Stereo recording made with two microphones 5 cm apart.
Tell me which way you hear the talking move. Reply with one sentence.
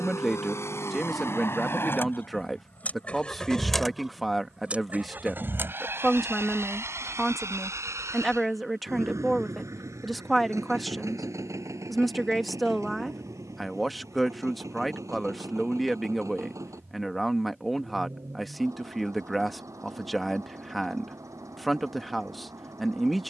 You can hear the talking stay in one place.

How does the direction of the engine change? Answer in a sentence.
In this clip you hear the engine travel towards the right.